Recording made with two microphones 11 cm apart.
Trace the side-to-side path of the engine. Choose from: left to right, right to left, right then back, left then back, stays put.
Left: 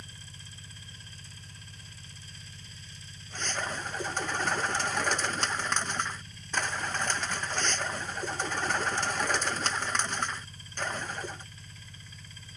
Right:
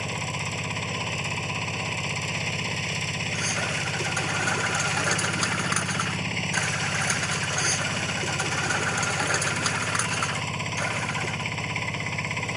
stays put.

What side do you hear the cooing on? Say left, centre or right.
centre.